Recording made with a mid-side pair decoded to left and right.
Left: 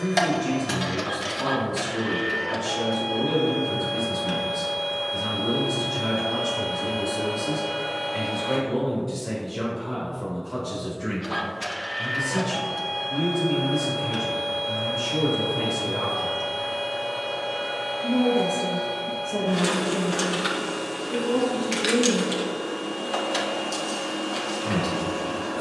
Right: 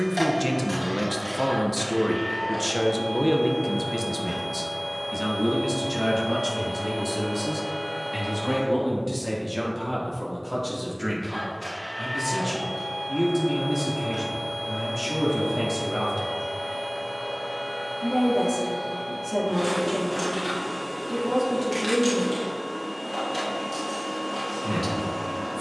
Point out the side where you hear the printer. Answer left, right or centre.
left.